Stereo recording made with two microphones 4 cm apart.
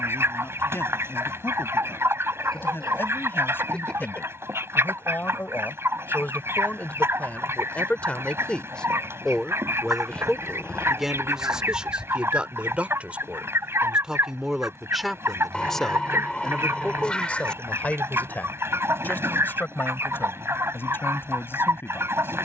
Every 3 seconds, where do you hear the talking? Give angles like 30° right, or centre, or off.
60° left, 50° left, 30° left, centre, 20° right, 20° left, 50° left, 60° left.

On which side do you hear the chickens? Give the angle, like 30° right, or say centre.
80° right.